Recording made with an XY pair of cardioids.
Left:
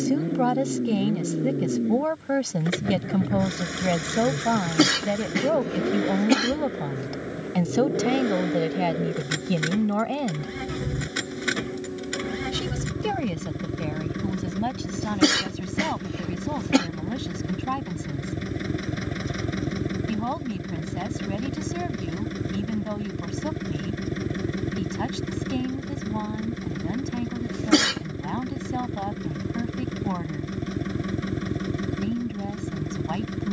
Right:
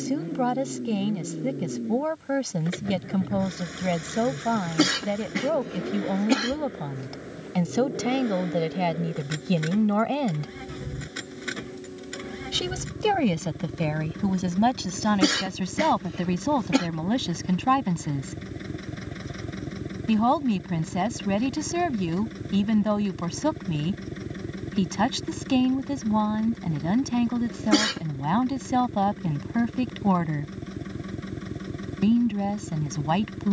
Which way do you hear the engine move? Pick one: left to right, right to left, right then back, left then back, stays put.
stays put.